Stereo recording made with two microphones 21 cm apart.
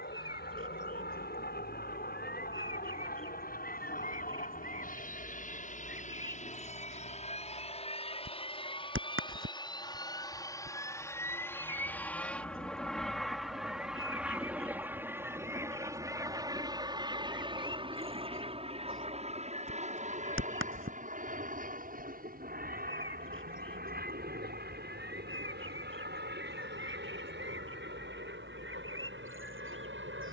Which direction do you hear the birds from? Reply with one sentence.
In this clip you hear the birds on the right.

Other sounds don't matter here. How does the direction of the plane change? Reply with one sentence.
In this clip you hear the plane travel towards the right.